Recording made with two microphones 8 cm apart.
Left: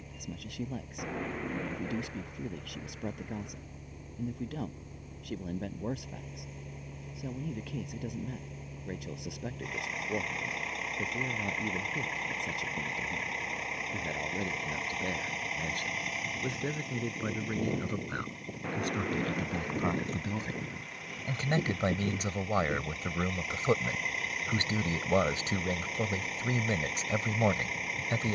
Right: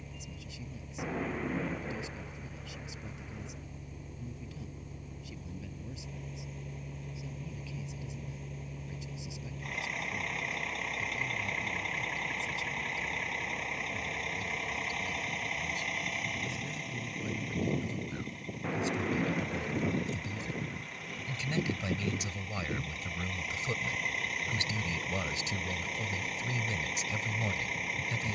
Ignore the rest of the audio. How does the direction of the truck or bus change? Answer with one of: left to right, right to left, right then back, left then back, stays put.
stays put.